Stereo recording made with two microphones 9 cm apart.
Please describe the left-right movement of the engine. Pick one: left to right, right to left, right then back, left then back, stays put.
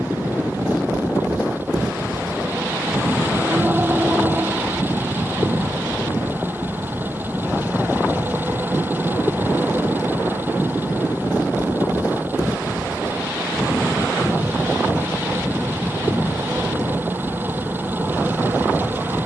stays put.